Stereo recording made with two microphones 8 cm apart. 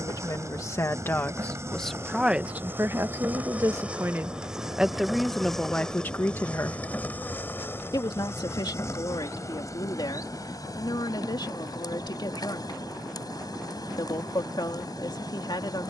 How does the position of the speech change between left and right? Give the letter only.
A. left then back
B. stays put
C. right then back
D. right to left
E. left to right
C.